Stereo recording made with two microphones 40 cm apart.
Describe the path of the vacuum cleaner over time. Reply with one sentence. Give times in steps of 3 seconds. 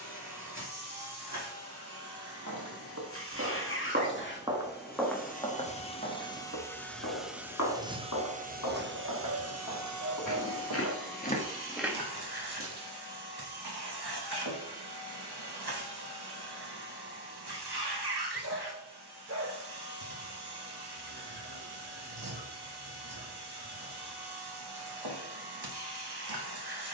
You can hear the vacuum cleaner on the left from 0 s, in the centre from 6 s and on the right from 9 s.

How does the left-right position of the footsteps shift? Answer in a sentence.
You can hear the footsteps go left and come back.